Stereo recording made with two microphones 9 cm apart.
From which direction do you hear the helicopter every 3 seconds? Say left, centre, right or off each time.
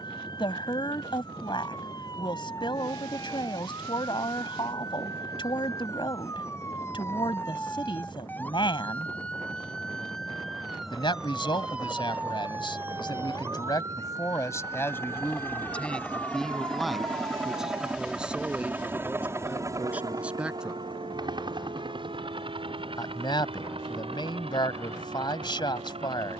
left, left, left, left, left, centre, right, right, right.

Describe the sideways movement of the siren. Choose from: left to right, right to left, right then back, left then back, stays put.
left to right.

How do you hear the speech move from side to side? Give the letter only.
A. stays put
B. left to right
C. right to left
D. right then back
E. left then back
D.